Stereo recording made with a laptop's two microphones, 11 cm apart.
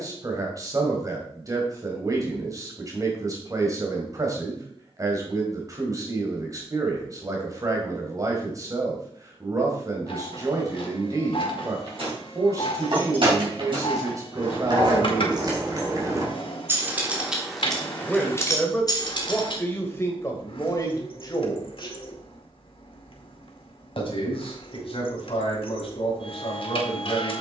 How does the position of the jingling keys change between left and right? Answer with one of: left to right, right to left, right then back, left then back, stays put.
right to left.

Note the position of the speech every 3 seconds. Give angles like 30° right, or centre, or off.
30° right, 30° right, 30° right, 30° right, 30° right, 30° right, 20° left, 40° left, 60° left.